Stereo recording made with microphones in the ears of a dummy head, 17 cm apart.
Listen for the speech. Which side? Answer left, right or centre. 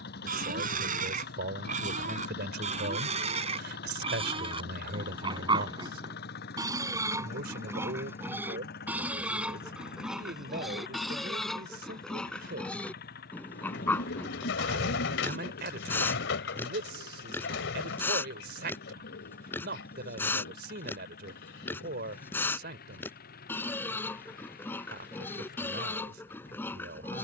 right.